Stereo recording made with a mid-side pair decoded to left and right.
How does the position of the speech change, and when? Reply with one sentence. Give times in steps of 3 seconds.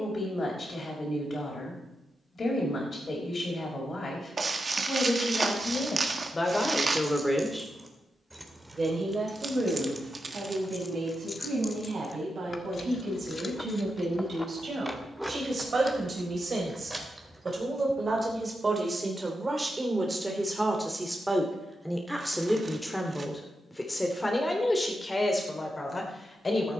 In this clip you hear the speech on the left from 0 s, in the centre from 6 s, on the right from 9 s, in the centre from 21 s and on the left from 24 s.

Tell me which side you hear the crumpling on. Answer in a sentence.
In this clip you hear the crumpling on the right.